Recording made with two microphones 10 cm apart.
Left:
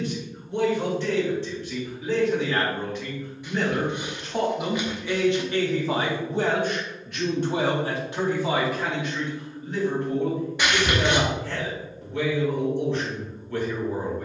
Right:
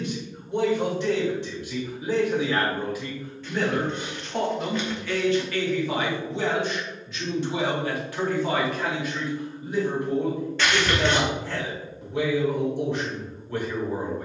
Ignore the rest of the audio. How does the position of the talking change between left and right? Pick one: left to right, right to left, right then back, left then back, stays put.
left then back.